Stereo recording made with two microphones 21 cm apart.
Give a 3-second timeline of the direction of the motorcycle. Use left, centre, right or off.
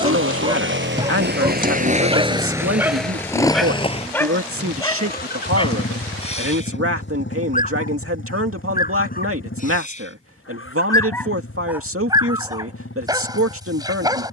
right, left, left, left, left.